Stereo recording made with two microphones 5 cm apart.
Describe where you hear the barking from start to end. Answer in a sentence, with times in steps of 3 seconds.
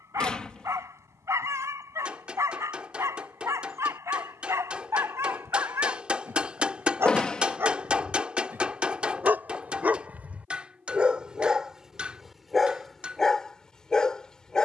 You can hear the barking on the right from 0 s and in the centre from 12 s.